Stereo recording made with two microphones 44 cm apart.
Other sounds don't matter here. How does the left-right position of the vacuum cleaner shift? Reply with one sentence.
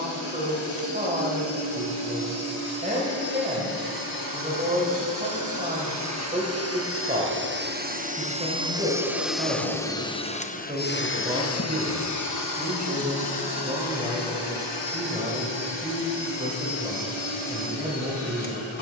In this clip you hear the vacuum cleaner move from right to left.